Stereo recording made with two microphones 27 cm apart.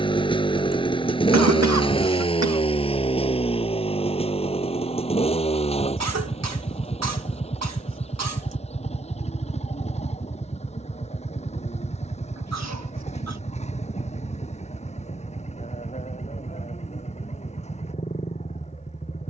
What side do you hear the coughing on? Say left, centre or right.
right.